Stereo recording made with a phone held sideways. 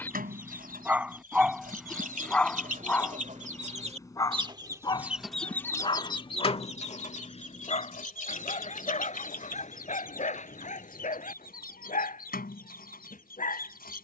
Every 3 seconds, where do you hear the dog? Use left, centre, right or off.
centre, left, left, left, left.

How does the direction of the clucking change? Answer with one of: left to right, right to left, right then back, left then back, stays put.
right to left.